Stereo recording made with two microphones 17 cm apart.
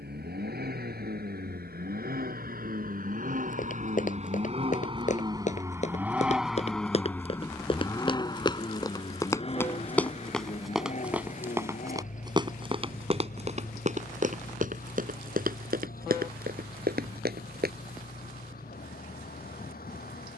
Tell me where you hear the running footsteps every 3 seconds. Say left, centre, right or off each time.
off, left, left, centre, right, right, off.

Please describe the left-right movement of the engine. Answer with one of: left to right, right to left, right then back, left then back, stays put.
right to left.